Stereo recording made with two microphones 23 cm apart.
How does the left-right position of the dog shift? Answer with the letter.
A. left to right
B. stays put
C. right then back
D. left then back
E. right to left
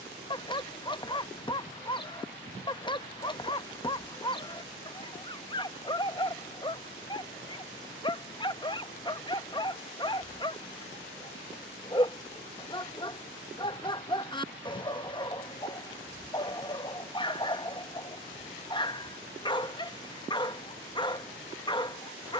B.